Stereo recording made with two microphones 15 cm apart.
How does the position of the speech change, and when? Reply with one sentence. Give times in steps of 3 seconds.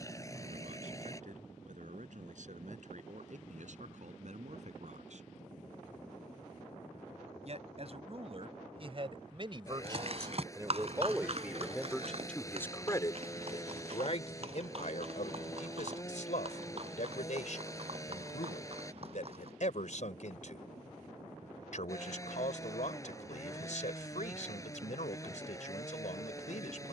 In this clip you hear the speech on the right from 0 s and on the left from 12 s.